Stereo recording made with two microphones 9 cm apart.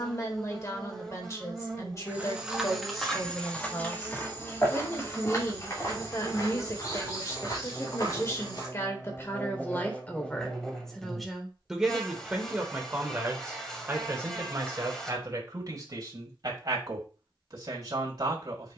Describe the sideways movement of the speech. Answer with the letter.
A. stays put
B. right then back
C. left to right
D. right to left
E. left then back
C.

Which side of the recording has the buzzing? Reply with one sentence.
In this clip you hear the buzzing in the centre.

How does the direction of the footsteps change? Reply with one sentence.
In this clip you hear the footsteps travel towards the left.